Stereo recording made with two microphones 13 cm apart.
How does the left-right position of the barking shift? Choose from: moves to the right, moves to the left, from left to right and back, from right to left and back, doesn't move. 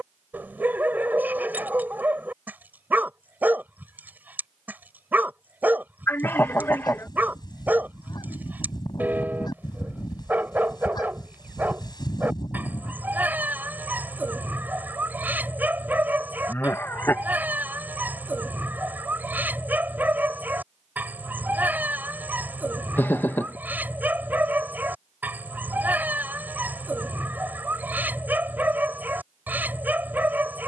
doesn't move.